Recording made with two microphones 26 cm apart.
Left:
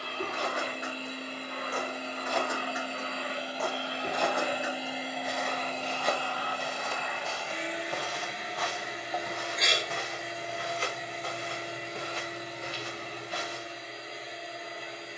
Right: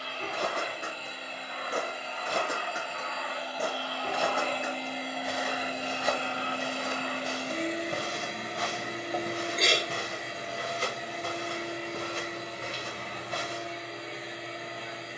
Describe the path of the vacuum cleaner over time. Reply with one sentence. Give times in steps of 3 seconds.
You can hear the vacuum cleaner on the left from 0 s, in the centre from 3 s and on the right from 6 s.